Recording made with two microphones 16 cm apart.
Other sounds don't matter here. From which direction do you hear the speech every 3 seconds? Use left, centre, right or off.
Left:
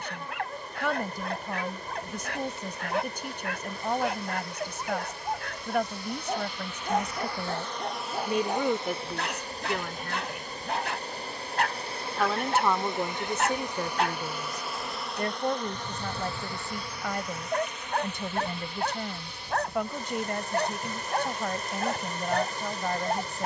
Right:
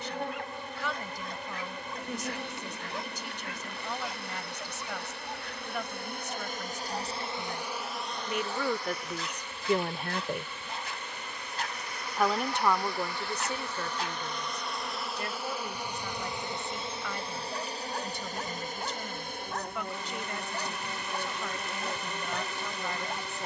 left, left, left, right, left, left, left, left.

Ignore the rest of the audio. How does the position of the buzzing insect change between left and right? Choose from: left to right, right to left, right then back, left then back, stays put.
left then back.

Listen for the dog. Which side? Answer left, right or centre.
left.